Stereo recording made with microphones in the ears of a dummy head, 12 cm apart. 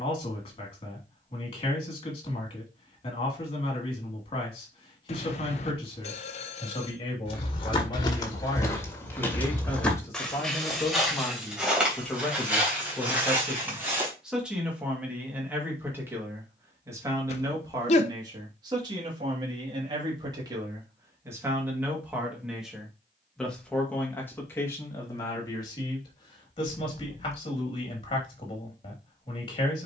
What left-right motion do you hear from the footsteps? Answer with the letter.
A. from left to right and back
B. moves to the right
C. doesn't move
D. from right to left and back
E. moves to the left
B.